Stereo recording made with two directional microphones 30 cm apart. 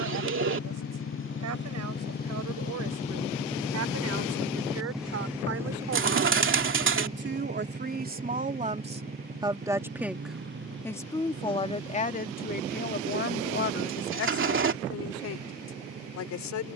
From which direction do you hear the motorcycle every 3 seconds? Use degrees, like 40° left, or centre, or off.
40° left, centre, 20° right, 40° right, 40° right, 50° right.